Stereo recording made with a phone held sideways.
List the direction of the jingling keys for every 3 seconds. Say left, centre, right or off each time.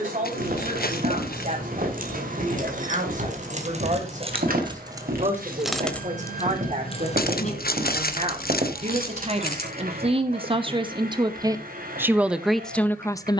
right, right, left, left, off.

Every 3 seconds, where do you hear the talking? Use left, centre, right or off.
right, right, right, right, centre.